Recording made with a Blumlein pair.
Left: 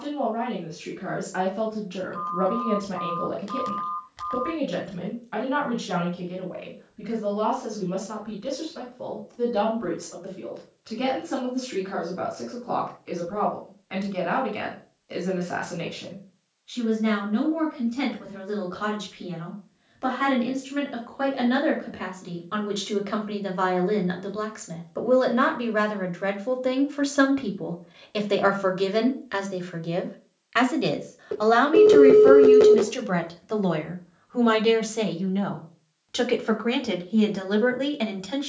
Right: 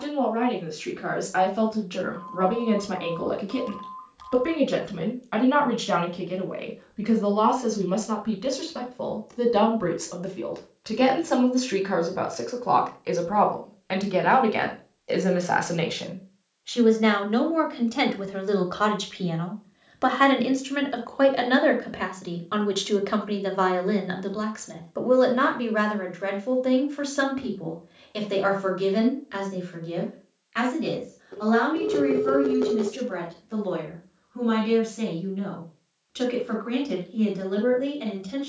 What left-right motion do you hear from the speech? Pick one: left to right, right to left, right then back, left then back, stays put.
right to left.